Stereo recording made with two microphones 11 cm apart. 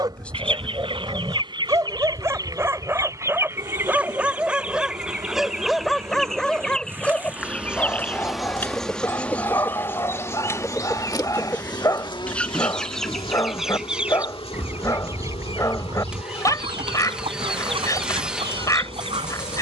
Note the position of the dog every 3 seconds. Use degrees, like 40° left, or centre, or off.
30° right, 10° right, 10° left, 30° left, 30° left, 30° left, 30° left.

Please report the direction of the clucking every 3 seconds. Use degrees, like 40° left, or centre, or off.
40° right, 10° right, 10° left, 20° left, centre, 50° right, 60° right.